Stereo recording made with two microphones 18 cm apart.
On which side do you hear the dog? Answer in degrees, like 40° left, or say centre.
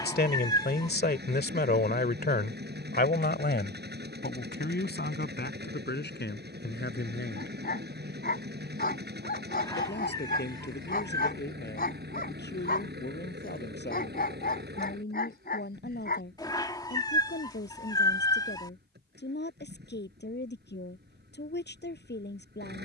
60° left.